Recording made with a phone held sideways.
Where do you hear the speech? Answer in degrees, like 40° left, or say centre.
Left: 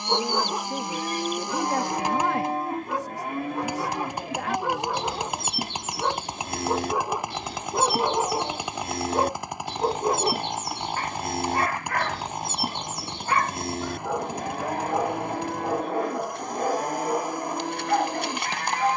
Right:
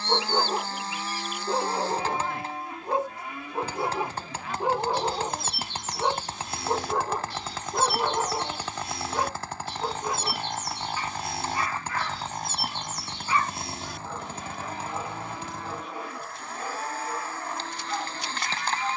80° left.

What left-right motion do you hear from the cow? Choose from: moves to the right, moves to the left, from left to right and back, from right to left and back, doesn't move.
doesn't move.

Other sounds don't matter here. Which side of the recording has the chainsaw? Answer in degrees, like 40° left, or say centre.
10° left.